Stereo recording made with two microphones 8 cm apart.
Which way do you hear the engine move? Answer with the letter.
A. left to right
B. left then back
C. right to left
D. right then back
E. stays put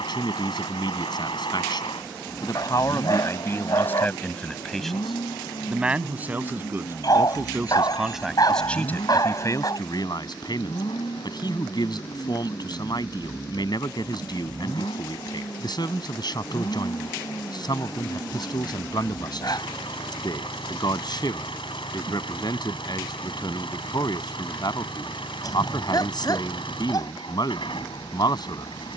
E.